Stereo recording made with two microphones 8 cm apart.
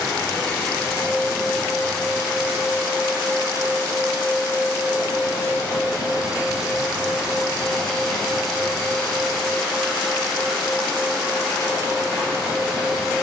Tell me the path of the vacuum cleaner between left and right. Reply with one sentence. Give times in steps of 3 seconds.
In this clip you hear the vacuum cleaner in the centre from 0 s, on the right from 3 s and in the centre from 6 s.